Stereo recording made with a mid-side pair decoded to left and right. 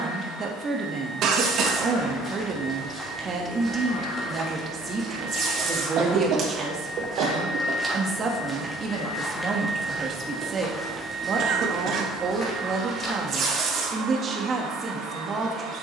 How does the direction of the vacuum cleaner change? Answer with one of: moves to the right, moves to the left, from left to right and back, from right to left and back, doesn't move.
moves to the right.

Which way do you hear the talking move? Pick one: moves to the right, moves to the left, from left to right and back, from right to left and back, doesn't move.
doesn't move.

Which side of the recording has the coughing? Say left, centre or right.
right.